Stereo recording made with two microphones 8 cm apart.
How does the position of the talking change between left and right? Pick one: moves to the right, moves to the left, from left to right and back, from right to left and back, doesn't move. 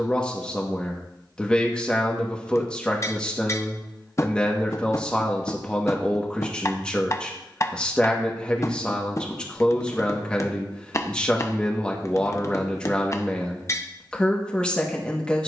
doesn't move.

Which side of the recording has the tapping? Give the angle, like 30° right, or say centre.
40° left.